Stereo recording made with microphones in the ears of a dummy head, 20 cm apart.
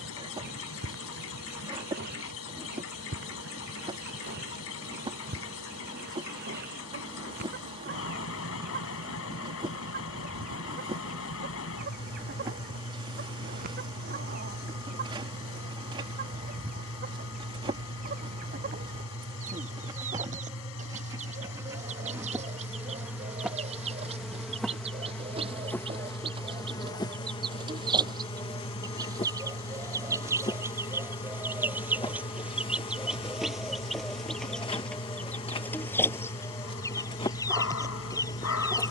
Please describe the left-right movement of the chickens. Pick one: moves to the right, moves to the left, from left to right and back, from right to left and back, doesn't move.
moves to the left.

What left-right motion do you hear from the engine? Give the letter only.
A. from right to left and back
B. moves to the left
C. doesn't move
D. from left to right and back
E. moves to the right
C.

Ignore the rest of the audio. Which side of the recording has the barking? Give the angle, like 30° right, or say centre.
70° left.